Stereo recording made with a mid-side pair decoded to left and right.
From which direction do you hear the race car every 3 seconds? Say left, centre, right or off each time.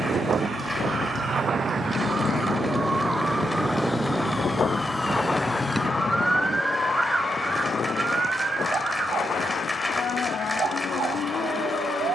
right, centre, left, left.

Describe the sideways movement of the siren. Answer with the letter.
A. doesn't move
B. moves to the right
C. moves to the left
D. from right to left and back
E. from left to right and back
B.